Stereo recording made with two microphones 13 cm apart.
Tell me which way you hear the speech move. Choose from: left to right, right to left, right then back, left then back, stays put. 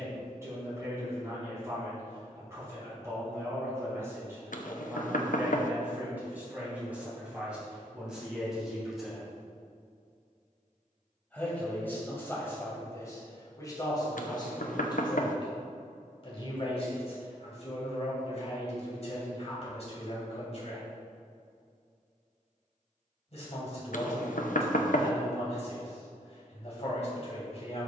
right to left.